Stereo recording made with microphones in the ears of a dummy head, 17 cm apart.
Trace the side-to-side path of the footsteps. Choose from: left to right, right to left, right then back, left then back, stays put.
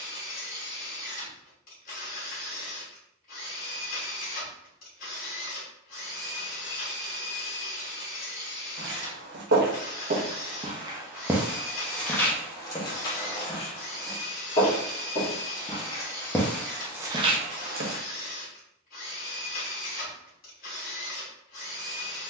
left then back.